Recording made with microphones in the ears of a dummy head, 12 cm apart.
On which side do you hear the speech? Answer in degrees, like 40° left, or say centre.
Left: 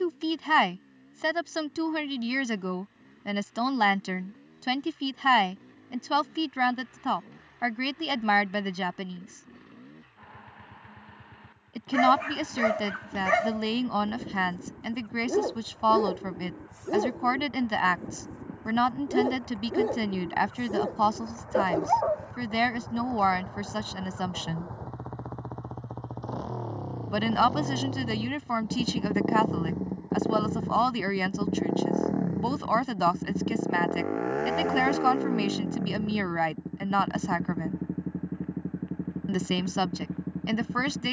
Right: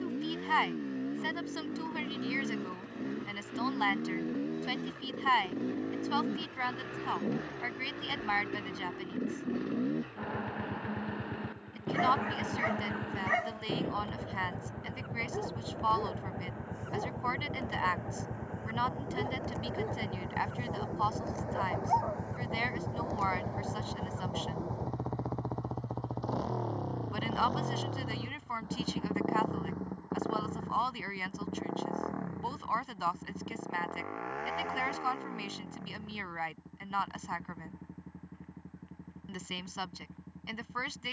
70° left.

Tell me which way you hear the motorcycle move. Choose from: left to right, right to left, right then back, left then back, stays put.
right to left.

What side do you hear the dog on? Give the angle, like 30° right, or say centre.
70° left.